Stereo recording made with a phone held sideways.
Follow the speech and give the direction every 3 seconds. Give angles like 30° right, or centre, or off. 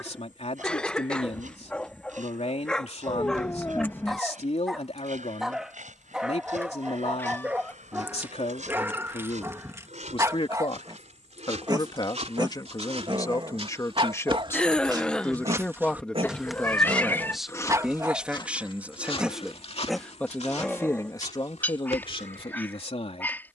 60° left, 60° left, 60° left, 50° left, 30° left, 10° left, centre, 40° left.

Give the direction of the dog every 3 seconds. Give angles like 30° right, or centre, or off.
10° left, centre, 10° right, 20° right, 40° right, 40° right, centre, 10° left.